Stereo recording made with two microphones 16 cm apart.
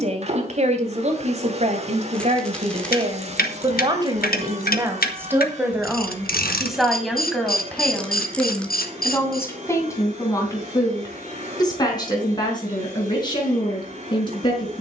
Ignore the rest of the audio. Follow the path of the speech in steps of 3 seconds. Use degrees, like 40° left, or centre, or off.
40° right, 20° right, centre, 20° left, 30° left.